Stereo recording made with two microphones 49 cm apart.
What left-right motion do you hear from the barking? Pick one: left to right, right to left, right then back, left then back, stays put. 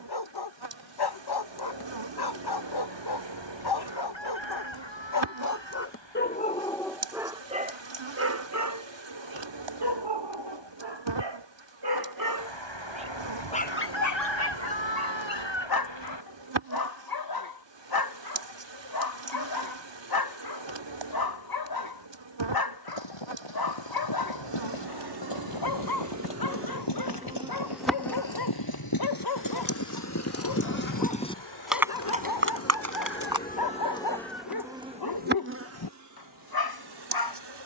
right then back.